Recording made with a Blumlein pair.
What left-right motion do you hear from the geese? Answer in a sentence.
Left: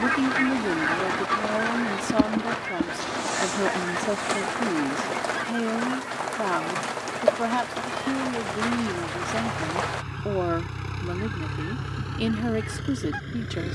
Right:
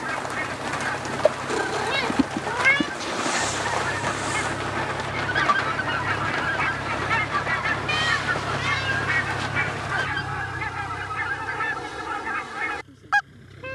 You can hear the geese move from left to right.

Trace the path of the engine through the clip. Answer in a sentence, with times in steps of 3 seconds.
You can hear the engine on the right from 0 s, in the centre from 9 s and on the left from 12 s.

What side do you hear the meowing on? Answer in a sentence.
You can hear the meowing on the right.